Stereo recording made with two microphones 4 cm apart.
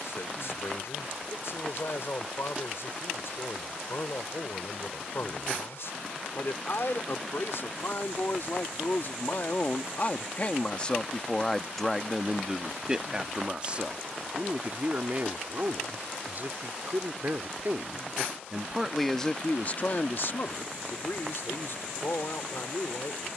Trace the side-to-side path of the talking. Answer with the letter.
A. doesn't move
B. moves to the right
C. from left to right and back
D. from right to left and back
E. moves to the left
C.